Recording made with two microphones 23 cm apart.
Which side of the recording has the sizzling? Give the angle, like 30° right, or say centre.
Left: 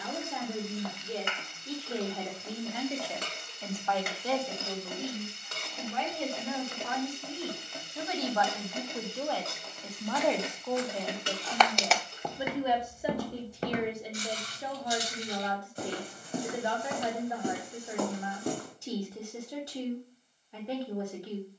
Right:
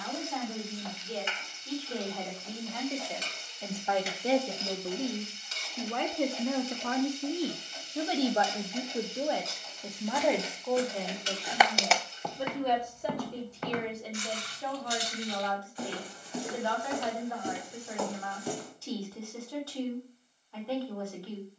60° left.